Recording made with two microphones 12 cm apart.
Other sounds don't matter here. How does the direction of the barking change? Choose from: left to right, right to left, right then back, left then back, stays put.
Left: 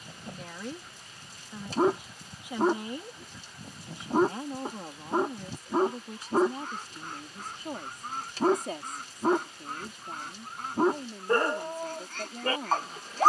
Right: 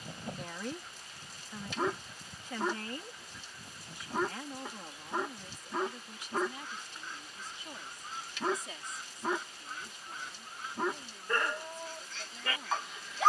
stays put.